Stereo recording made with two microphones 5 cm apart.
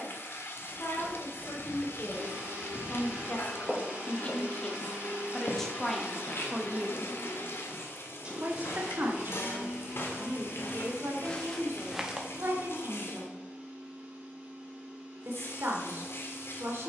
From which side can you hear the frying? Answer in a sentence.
In this clip you hear the frying on the left.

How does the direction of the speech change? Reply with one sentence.
You can hear the speech move to the right.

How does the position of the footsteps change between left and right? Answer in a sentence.
In this clip you hear the footsteps move from right to left and back again.